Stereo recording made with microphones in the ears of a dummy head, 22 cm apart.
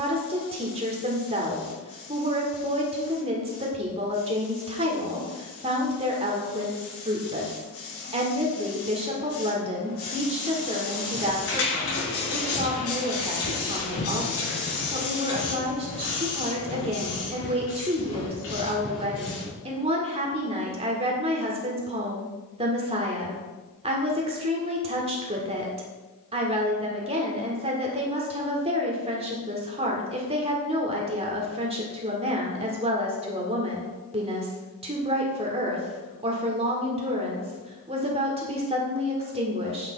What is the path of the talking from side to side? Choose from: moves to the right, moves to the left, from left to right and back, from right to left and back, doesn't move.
doesn't move.